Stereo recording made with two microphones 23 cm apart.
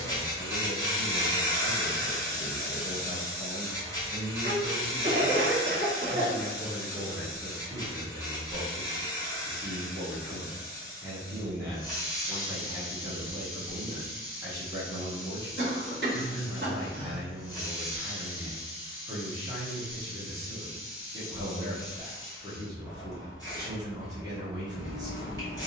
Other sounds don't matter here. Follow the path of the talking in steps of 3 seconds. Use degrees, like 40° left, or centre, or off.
10° right, 20° left, centre, 20° right, 20° right, 20° right, 20° right, 20° right, 20° right.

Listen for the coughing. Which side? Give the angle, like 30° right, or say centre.
50° right.